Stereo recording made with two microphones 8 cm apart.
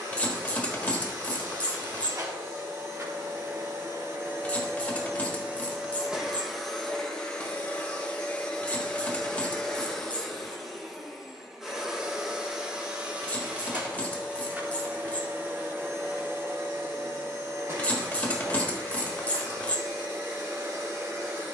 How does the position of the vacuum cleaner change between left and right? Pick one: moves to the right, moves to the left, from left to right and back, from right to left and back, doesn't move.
from right to left and back.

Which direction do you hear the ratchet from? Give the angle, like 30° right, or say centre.
20° left.